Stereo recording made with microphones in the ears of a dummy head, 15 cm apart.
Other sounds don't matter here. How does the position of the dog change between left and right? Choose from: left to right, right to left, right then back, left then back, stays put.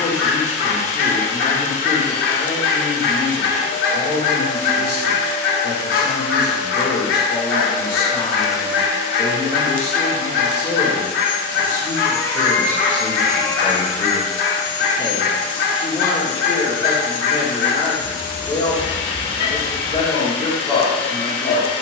stays put.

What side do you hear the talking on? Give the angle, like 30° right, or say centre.
30° left.